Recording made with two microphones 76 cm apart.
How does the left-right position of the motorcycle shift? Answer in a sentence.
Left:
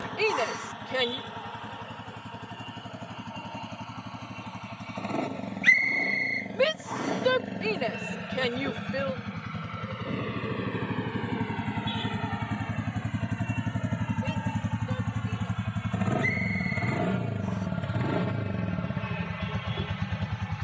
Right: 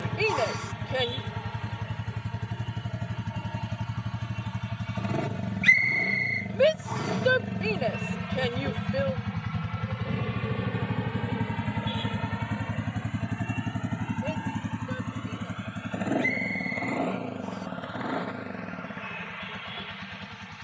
You can hear the motorcycle move from right to left.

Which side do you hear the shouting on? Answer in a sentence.
You can hear the shouting on the left.